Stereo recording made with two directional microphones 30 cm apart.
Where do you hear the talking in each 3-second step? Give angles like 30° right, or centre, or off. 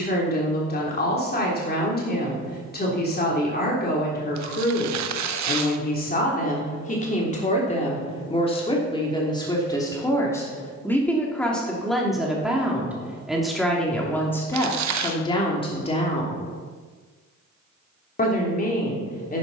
30° left, 30° left, 20° left, 10° left, centre, 20° left, 30° left.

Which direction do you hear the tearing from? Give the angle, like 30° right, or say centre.
70° right.